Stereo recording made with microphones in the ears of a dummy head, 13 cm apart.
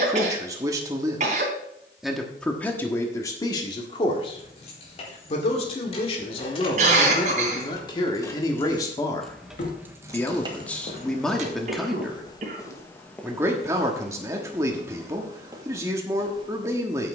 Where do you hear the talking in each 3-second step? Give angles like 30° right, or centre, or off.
10° right, 30° left, 30° left, 10° left, 20° right, 20° right.